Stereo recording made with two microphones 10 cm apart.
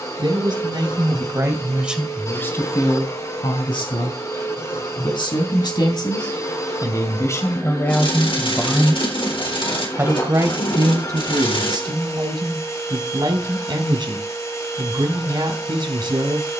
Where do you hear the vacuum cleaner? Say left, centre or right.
left.